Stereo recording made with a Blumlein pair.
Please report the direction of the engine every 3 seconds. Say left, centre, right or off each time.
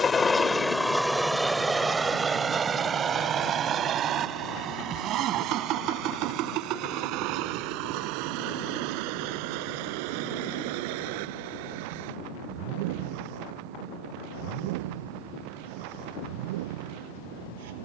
centre, right, right, right, right, right.